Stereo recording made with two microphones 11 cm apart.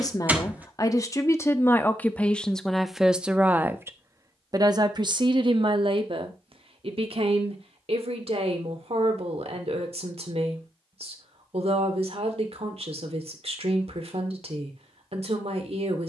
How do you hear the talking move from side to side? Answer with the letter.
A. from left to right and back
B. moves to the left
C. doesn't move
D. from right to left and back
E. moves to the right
E.